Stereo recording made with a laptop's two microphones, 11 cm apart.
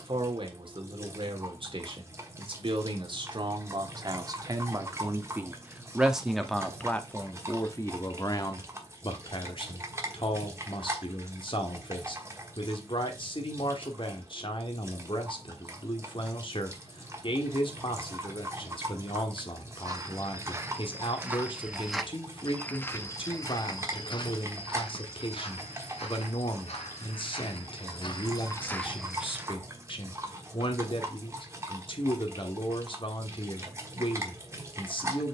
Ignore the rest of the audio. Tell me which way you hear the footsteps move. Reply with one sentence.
You can hear the footsteps move from right to left and back again.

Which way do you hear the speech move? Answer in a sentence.
In this clip you hear the speech go from the right side to the left.